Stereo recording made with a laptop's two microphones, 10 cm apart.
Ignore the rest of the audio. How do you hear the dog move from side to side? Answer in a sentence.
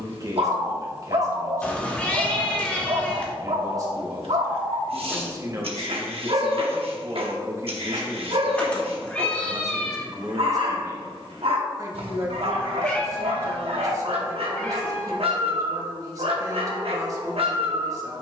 In this clip you hear the dog stay in one place.